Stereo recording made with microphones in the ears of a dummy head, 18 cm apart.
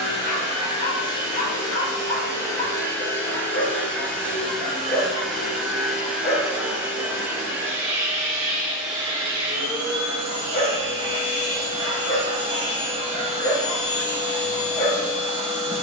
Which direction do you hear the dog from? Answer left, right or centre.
left.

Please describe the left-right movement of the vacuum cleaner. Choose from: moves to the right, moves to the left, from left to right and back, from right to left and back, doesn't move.
moves to the right.